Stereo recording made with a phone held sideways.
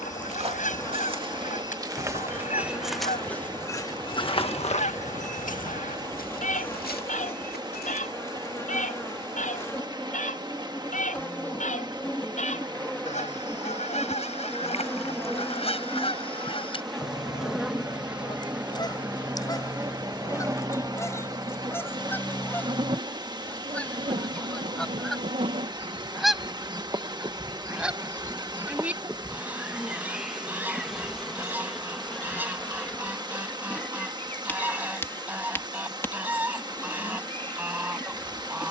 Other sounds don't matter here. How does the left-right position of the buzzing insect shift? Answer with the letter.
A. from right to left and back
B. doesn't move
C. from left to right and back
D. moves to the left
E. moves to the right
C.